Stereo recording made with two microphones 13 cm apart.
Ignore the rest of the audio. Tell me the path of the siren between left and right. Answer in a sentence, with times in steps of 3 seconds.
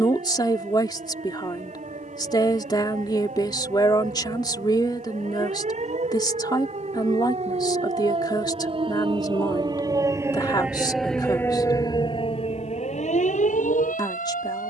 You can hear the siren on the right from 0 s, in the centre from 9 s and on the left from 12 s.